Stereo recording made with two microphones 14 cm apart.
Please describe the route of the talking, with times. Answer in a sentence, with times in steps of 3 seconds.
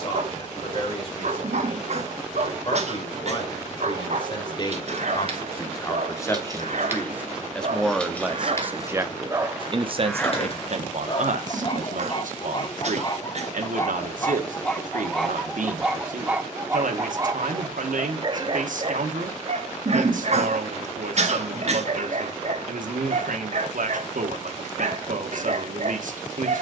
You can hear the talking on the left from 0 s, in the centre from 6 s and on the right from 9 s.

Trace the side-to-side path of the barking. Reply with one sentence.
In this clip you hear the barking move from right to left and back again.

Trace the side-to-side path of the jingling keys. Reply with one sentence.
In this clip you hear the jingling keys move from right to left.